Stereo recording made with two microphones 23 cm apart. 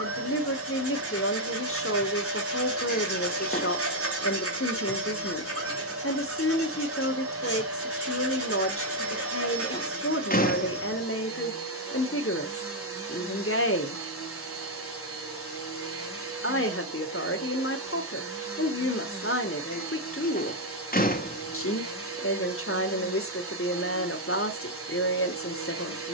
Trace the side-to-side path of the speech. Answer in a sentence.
You can hear the speech stay put.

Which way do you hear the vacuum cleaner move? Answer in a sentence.
In this clip you hear the vacuum cleaner stay in one place.